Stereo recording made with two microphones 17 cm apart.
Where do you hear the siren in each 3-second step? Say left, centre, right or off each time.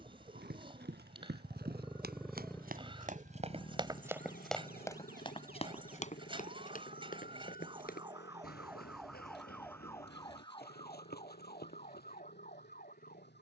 right, right, right, left, left.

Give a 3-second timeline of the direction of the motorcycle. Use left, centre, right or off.
right, left, left, left, left.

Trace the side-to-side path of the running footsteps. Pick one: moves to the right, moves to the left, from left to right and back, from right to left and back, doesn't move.
moves to the left.